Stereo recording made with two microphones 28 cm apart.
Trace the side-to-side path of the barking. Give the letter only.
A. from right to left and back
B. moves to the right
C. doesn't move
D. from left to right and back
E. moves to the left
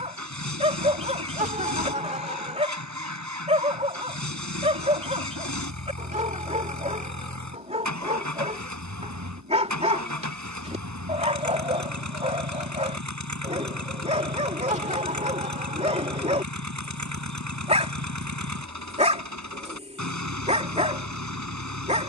C.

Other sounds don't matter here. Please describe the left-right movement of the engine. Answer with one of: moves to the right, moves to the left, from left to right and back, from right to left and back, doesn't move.
doesn't move.